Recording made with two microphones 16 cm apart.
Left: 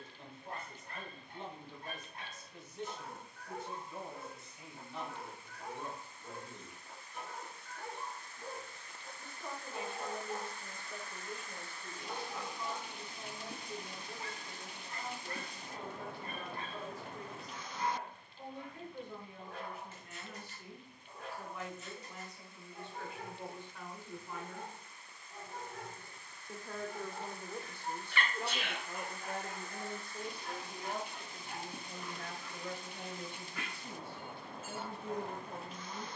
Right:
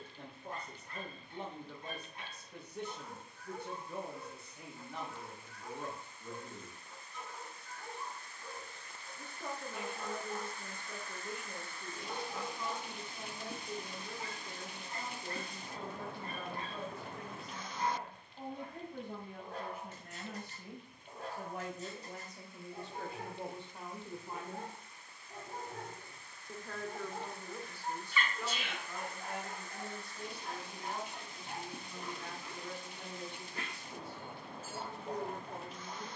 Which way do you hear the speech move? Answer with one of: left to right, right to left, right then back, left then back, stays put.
right to left.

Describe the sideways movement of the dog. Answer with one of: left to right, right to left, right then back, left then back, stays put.
left to right.